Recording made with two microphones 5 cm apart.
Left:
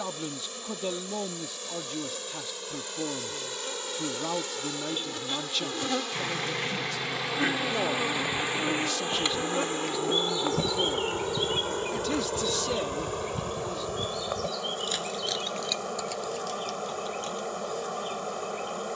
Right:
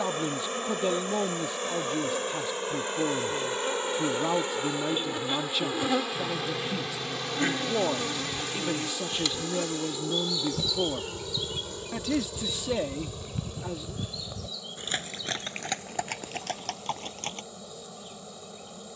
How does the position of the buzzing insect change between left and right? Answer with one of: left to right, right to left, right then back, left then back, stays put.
right to left.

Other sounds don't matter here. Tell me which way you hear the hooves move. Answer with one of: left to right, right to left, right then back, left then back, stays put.
left to right.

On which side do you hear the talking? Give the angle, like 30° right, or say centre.
10° right.